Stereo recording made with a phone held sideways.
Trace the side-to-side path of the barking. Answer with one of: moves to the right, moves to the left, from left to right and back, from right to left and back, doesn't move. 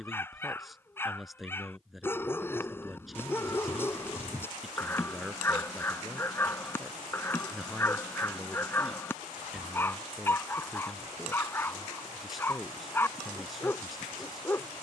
doesn't move.